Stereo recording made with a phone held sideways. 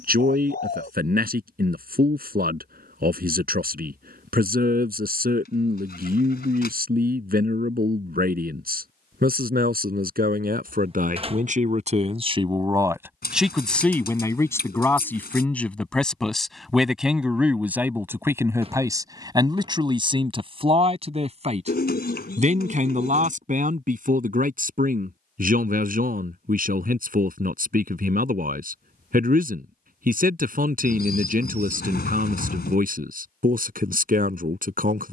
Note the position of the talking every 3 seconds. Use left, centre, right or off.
right, right, right, right, centre, centre, right, right, right, right, right, right.